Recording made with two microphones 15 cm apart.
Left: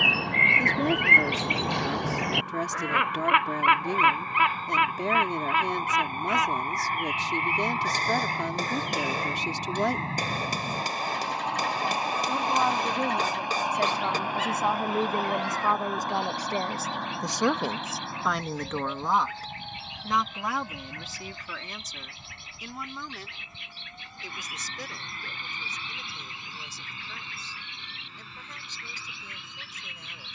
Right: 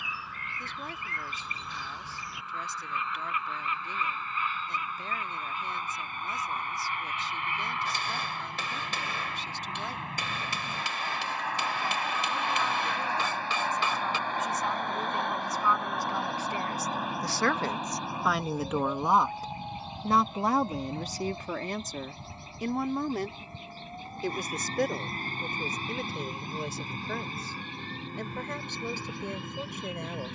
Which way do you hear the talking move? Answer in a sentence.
You can hear the talking move to the right.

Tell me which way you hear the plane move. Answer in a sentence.
You can hear the plane go from the left side to the right.